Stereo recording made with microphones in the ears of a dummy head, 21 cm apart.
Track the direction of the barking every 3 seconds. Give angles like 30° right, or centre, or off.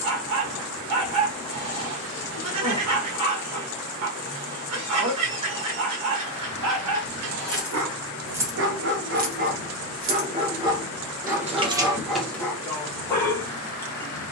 80° right, 80° right, 70° right, 20° right, 10° left.